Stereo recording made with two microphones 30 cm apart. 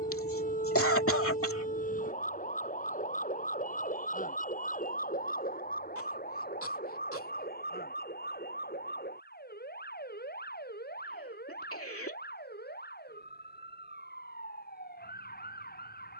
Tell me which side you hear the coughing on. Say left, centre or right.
left.